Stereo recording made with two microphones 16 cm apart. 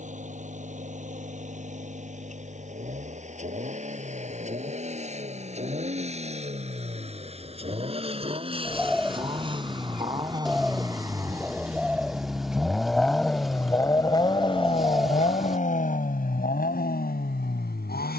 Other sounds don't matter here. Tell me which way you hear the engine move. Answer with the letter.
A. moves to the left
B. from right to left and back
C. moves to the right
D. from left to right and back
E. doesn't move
A.